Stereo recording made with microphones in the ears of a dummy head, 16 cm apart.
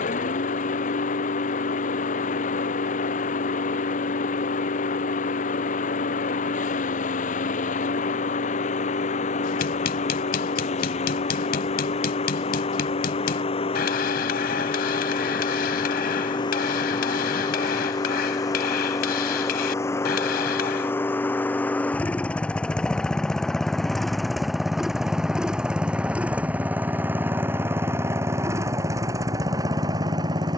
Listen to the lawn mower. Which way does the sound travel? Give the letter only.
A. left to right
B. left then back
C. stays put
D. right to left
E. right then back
A.